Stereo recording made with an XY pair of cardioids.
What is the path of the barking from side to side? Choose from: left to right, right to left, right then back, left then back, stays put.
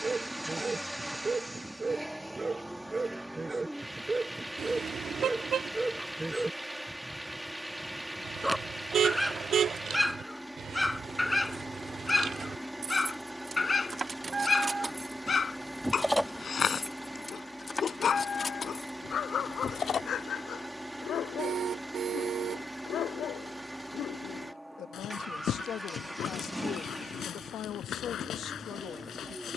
right to left.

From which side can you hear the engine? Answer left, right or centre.
centre.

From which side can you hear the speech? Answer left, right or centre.
left.